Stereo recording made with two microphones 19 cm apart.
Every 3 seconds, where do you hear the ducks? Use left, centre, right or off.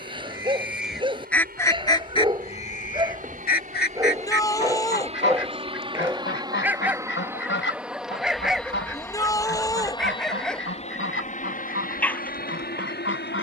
centre, left, left, left, left.